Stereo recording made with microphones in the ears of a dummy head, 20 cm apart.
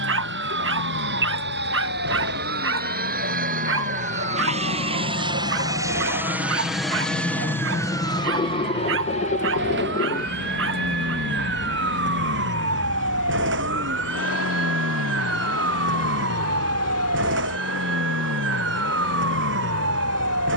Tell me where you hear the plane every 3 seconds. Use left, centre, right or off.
right, right, centre, left, left, left, left.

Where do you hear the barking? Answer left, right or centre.
right.